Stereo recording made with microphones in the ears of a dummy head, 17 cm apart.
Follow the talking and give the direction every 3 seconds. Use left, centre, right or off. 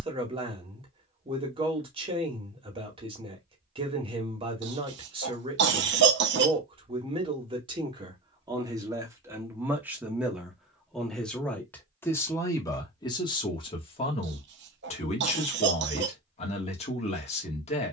right, right, right, centre, left, left.